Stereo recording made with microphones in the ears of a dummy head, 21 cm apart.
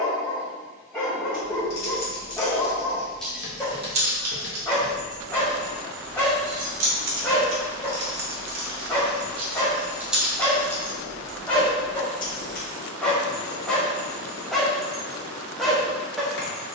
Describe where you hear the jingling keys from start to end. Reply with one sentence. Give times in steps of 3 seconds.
You can hear the jingling keys on the left from 0 s, on the right from 3 s, in the centre from 9 s, on the left from 12 s and not at all from 15 s.